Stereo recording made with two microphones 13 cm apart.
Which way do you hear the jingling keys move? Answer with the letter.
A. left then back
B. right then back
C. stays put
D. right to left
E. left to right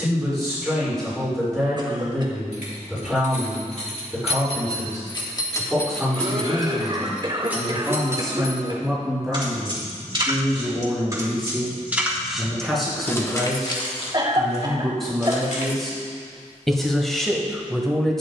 B.